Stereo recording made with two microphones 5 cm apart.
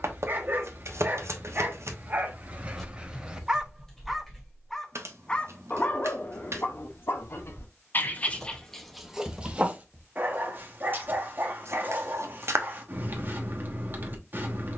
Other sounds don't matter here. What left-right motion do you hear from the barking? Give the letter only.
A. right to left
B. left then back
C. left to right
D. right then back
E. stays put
B.